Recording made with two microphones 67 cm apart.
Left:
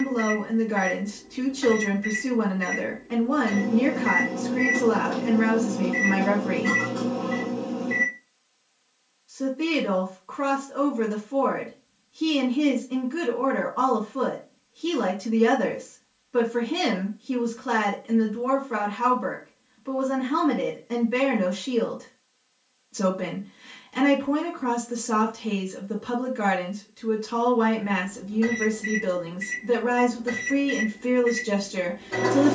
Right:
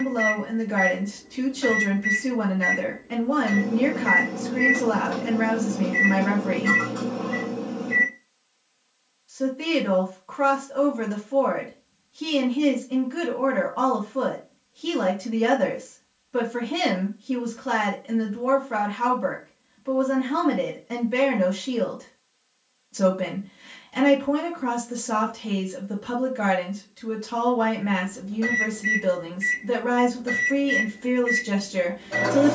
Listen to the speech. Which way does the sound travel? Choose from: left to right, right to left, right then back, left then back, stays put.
stays put.